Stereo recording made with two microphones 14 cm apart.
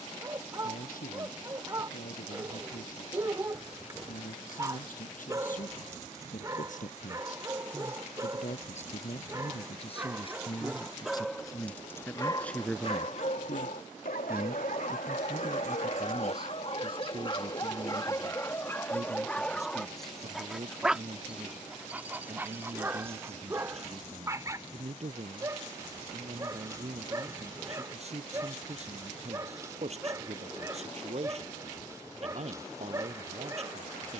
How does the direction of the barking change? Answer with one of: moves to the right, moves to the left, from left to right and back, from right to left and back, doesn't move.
from right to left and back.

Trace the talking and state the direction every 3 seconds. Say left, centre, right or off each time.
left, left, left, left, centre, right, right, right, right, right, right, right.